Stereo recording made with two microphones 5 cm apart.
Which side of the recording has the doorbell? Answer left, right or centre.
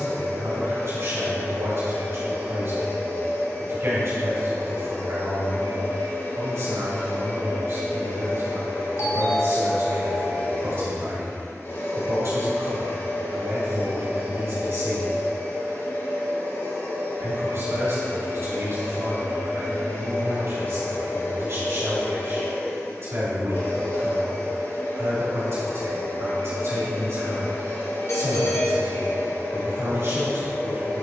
left.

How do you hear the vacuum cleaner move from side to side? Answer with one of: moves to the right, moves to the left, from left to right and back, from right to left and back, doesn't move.
doesn't move.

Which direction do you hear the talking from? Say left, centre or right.
right.